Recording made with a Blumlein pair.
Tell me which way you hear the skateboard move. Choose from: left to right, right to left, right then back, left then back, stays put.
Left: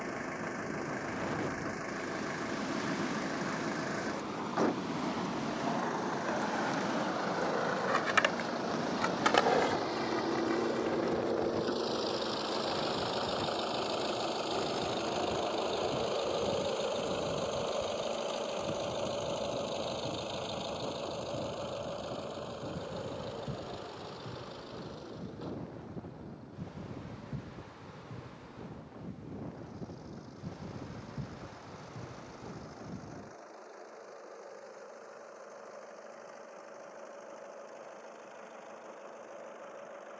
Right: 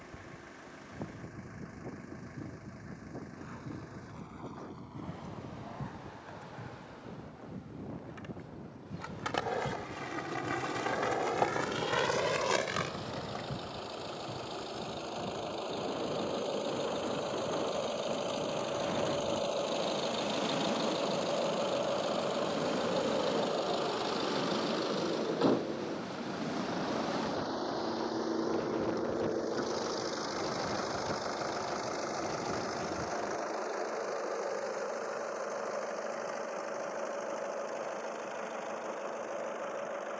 left to right.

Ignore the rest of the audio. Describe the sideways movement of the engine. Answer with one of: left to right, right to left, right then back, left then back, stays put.
left to right.